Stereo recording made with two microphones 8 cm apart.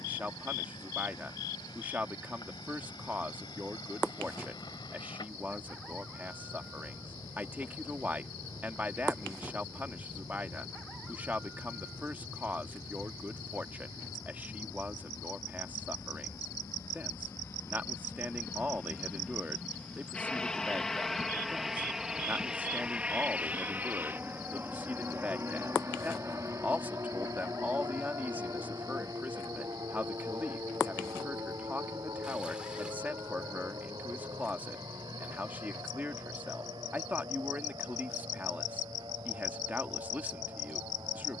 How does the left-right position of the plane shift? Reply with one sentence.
In this clip you hear the plane move to the right.